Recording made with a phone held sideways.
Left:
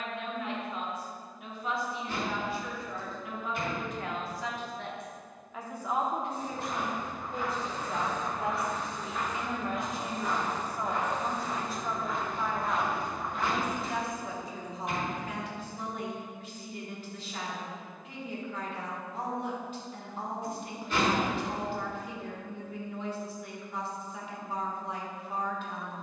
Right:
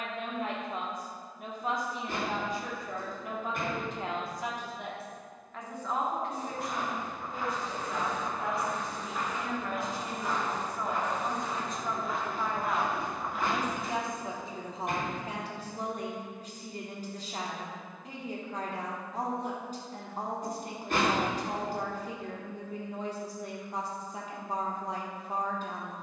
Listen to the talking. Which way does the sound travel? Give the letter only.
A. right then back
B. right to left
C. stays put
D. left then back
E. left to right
D.